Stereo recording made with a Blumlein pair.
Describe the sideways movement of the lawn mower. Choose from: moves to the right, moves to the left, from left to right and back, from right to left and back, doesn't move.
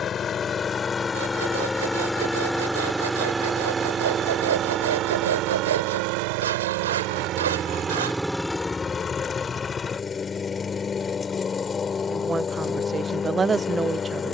from left to right and back.